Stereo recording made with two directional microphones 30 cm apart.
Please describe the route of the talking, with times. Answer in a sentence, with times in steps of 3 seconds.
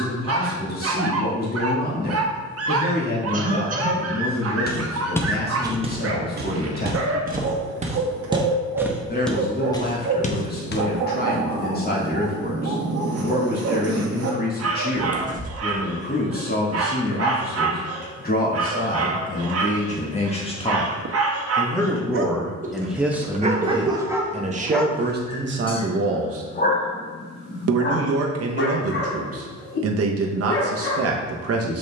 In this clip you hear the talking on the left from 0 s, in the centre from 21 s and on the right from 24 s.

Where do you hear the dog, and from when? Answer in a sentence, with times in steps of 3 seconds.
In this clip you hear the dog on the right from 0 s, in the centre from 24 s and on the left from 27 s.